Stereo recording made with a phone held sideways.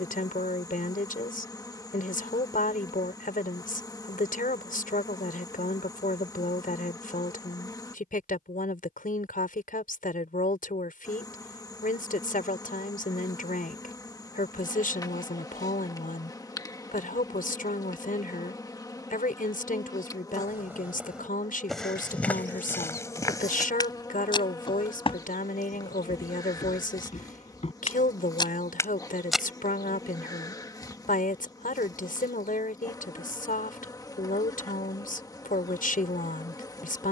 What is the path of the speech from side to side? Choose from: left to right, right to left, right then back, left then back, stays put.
stays put.